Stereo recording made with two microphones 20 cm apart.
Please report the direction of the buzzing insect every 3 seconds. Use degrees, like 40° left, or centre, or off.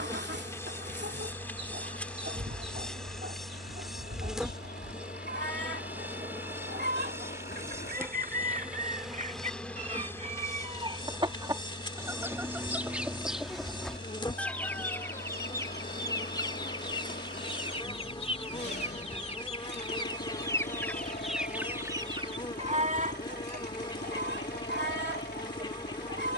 10° left, centre, 10° right, 10° left, 20° left, 20° left, 20° left, 20° left, 20° left.